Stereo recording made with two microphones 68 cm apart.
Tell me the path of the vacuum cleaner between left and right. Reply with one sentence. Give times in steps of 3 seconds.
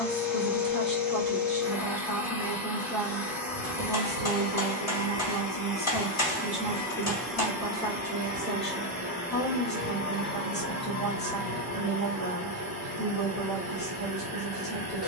In this clip you hear the vacuum cleaner on the left from 0 s, in the centre from 6 s and on the right from 9 s.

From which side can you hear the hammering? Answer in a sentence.
In this clip you hear the hammering on the left.